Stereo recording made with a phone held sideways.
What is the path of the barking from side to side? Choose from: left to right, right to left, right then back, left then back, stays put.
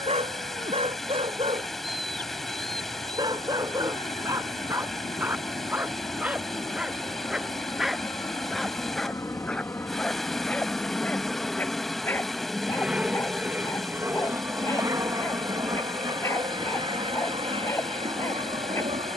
right to left.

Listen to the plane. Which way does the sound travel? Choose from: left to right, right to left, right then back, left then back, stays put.
left to right.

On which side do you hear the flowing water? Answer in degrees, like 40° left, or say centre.
centre.